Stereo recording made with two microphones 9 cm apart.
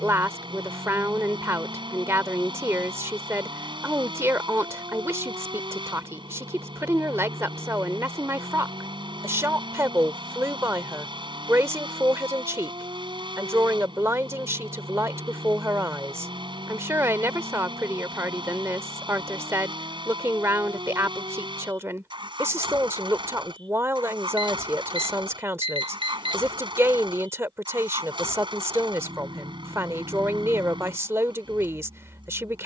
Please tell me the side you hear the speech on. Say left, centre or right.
right.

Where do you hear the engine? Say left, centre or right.
right.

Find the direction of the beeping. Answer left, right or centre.
right.